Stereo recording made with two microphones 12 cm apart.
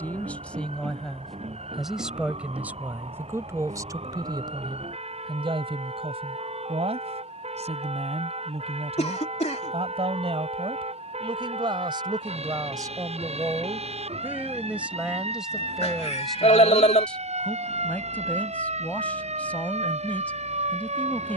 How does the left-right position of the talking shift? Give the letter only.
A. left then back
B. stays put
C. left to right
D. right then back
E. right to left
D.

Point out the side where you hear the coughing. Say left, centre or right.
left.